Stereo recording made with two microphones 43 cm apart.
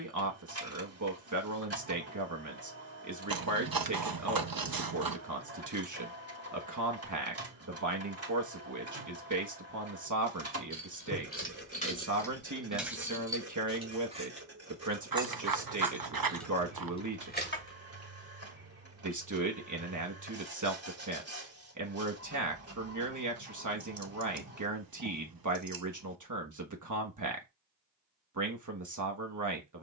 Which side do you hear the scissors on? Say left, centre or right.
right.